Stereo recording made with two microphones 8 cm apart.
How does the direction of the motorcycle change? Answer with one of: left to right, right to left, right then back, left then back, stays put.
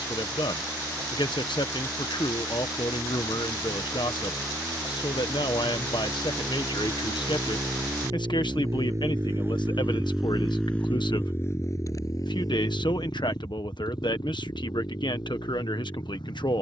right to left.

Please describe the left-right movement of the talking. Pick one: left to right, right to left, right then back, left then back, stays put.
stays put.